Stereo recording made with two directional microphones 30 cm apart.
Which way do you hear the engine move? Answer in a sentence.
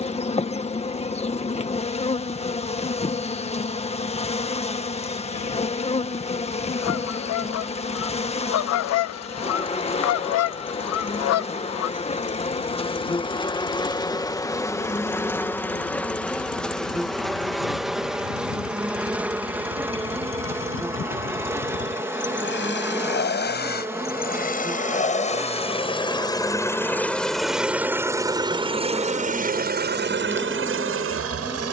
You can hear the engine travel towards the right.